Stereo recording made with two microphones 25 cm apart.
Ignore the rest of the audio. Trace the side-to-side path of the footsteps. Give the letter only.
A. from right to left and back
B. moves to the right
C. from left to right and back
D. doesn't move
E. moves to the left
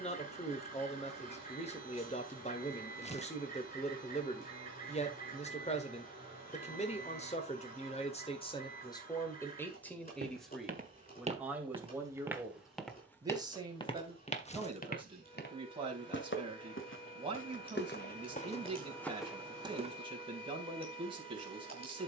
A.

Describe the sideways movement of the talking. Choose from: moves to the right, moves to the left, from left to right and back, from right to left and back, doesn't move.
moves to the right.